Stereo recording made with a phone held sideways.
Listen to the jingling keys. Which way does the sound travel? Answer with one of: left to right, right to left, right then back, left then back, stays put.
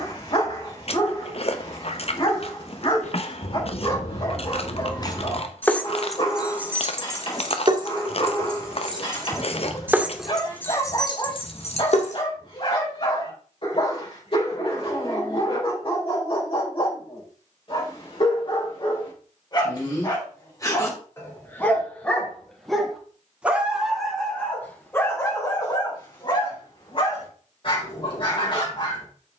right then back.